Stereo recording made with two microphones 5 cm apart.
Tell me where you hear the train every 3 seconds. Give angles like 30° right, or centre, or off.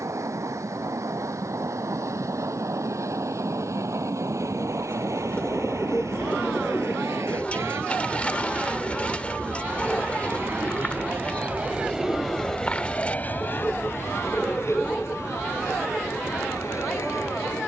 80° right, 80° right, 70° right, 50° right, 30° left, 70° left.